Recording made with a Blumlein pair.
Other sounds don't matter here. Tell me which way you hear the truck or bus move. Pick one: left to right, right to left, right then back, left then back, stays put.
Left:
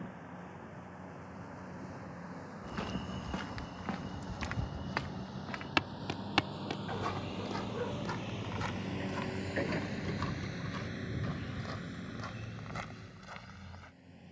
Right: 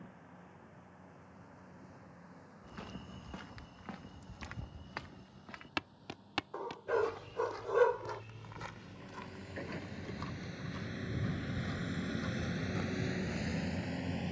left to right.